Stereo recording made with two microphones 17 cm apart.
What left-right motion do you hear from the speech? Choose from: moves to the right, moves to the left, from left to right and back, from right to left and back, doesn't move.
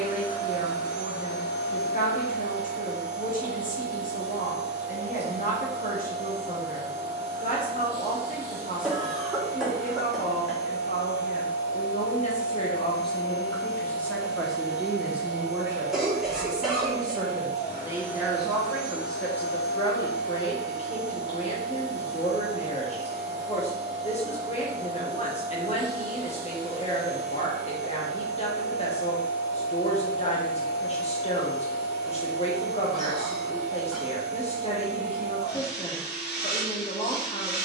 from left to right and back.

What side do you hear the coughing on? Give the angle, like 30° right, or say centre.
centre.